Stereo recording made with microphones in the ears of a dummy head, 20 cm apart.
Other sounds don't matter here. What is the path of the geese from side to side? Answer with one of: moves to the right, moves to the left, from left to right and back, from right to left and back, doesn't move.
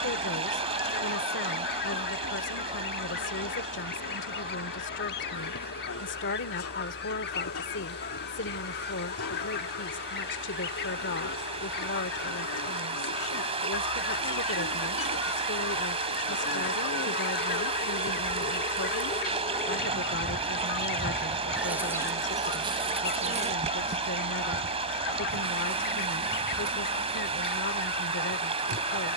doesn't move.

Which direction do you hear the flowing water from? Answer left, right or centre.
right.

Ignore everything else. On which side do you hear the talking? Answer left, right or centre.
left.